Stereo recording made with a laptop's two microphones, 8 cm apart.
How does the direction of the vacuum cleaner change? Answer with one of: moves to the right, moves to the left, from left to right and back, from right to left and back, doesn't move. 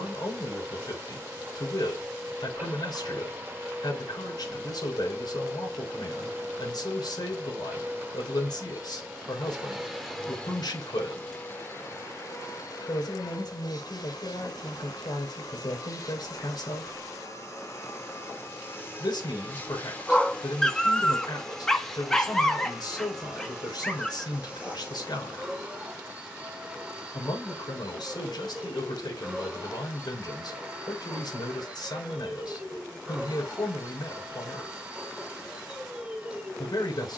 from right to left and back.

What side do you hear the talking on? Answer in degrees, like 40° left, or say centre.
60° left.